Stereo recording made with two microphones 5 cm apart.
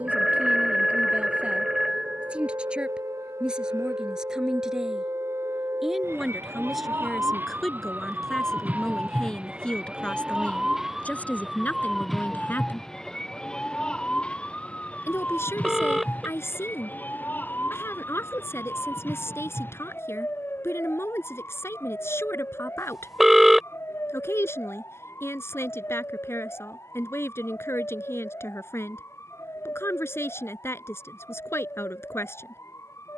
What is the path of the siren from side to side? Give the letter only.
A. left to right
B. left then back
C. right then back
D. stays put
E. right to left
E.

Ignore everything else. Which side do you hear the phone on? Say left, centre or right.
centre.